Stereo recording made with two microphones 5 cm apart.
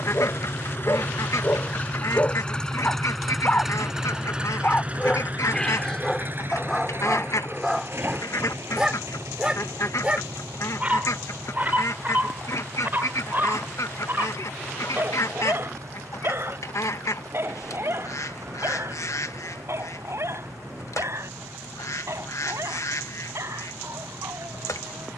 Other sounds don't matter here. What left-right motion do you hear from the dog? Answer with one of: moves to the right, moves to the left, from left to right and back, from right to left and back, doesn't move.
moves to the right.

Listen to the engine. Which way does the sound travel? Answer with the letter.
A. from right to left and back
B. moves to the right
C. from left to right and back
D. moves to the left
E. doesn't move
B.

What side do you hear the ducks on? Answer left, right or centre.
left.